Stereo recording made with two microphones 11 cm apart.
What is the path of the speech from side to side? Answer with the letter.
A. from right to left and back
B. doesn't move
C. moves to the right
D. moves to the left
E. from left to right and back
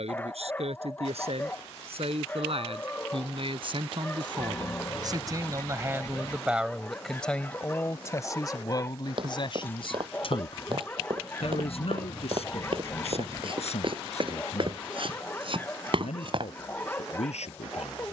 D.